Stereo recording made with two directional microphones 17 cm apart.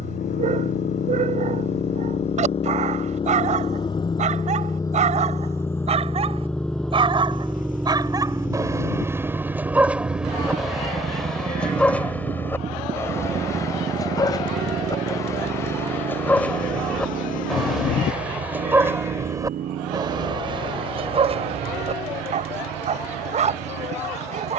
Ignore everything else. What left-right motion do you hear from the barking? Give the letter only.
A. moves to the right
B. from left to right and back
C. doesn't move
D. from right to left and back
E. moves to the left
D.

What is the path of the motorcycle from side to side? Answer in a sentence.
In this clip you hear the motorcycle move to the right.